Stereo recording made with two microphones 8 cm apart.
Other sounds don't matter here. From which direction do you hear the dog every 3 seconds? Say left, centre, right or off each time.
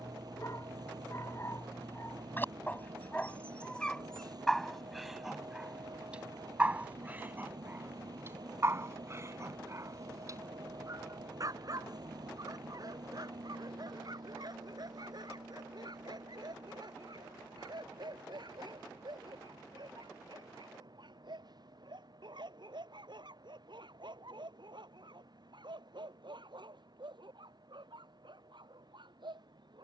left, centre, right, right, right, right, right, right, right, right.